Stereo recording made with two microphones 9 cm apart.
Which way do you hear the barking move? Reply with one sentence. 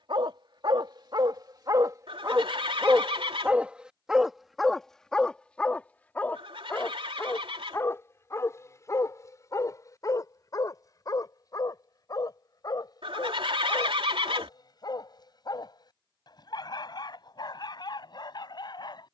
You can hear the barking go from the right side to the left.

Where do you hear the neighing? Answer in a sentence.
You can hear the neighing on the right.